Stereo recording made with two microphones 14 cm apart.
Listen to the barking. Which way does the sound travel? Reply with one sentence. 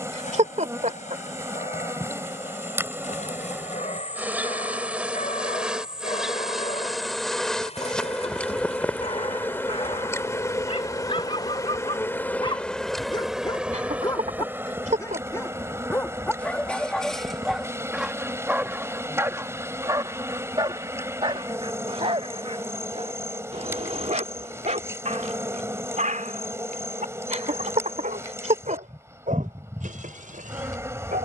In this clip you hear the barking move to the right.